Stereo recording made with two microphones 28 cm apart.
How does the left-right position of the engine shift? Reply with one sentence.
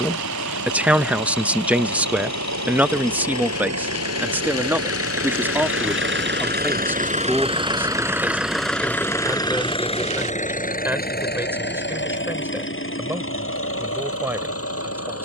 In this clip you hear the engine go from the right side to the left.